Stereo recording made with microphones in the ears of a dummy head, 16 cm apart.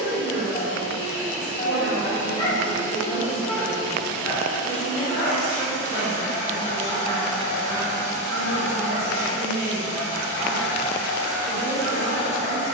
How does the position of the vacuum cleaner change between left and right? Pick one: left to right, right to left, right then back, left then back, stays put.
stays put.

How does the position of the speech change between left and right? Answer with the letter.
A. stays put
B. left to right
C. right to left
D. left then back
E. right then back
D.